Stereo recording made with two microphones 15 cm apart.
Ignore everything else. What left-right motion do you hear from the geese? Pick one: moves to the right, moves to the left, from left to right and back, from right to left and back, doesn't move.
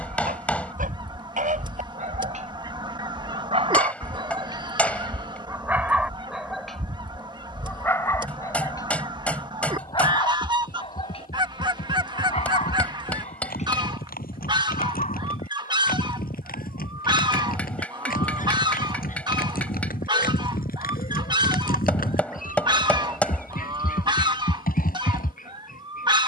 doesn't move.